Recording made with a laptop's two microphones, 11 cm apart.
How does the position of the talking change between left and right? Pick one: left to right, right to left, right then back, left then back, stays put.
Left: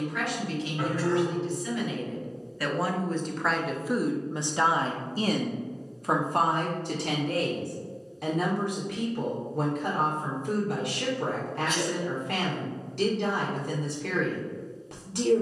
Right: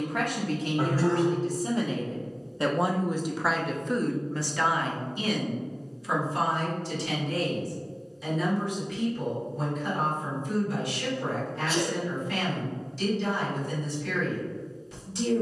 right to left.